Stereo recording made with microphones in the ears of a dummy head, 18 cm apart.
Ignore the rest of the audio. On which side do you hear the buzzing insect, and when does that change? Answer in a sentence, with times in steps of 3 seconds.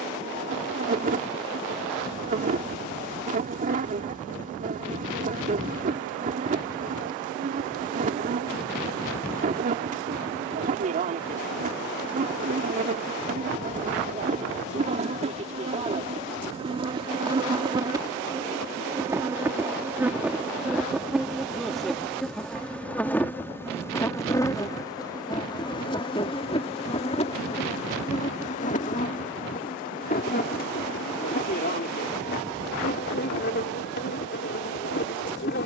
In this clip you hear the buzzing insect on the right from 0 s, in the centre from 18 s and on the left from 24 s.